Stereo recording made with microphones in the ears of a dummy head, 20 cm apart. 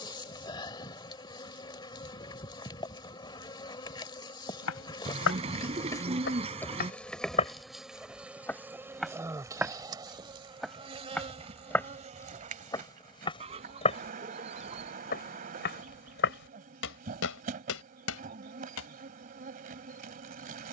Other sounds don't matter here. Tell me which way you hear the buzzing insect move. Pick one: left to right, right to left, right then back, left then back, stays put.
left to right.